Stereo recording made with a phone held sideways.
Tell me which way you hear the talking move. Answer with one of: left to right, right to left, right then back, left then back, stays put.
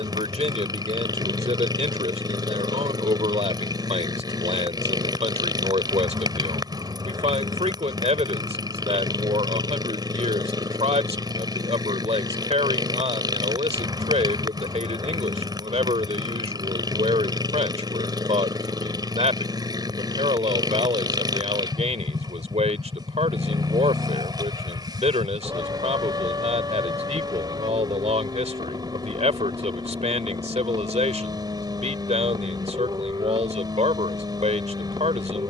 stays put.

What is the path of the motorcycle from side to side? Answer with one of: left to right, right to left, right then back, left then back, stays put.
stays put.